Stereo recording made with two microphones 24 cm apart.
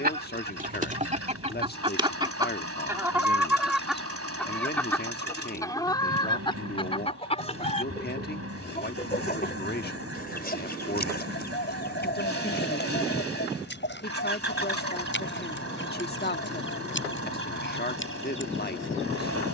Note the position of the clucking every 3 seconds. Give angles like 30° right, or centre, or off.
30° right, centre, 30° left, 40° left, 50° left, 50° left, 60° left.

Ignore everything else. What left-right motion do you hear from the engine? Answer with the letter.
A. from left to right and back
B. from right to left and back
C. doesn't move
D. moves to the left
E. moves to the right
C.